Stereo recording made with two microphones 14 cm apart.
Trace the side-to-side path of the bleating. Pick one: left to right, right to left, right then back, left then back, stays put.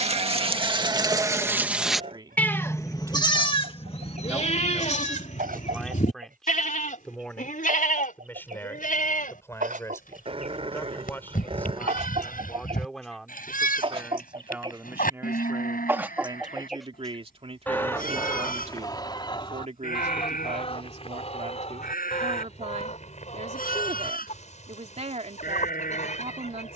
right to left.